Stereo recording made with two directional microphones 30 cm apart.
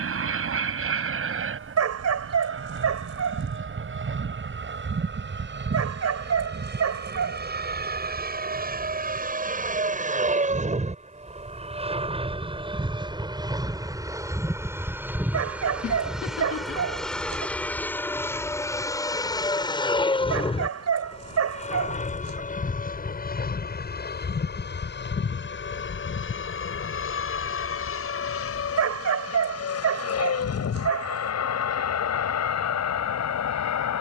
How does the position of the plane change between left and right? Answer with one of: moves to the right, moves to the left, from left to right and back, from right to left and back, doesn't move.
moves to the left.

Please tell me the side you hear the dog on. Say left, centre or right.
right.